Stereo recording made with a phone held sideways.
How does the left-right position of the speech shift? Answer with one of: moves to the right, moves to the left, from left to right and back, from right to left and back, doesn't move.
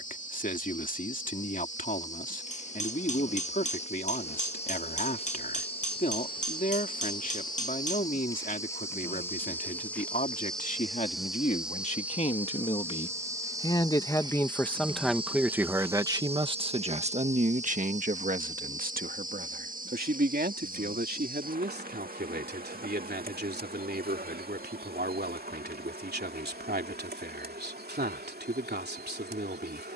moves to the right.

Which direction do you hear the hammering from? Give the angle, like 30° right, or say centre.
50° left.